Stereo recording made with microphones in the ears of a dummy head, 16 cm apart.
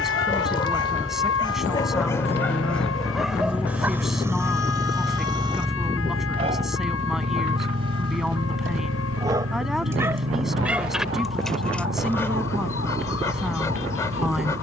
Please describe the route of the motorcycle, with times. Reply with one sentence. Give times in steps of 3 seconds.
In this clip you hear the motorcycle on the left from 0 s, in the centre from 3 s and on the right from 6 s.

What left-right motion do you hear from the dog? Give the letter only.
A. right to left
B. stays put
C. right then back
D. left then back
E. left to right
C.